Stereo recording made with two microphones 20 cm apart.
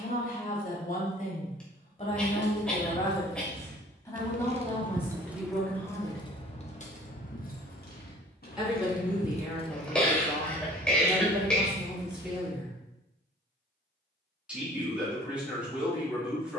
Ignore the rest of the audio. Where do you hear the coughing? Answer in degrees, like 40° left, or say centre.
centre.